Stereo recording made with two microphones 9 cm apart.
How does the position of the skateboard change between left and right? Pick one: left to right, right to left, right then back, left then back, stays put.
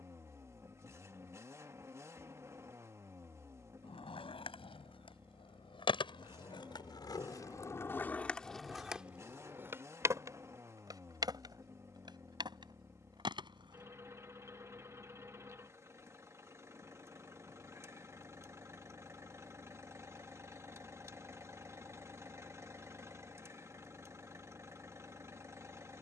left to right.